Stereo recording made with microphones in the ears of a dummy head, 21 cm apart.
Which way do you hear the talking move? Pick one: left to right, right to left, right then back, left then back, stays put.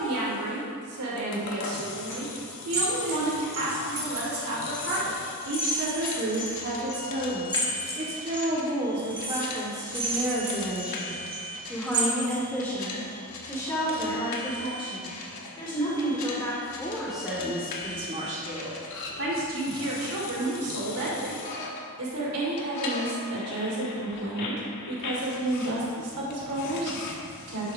left then back.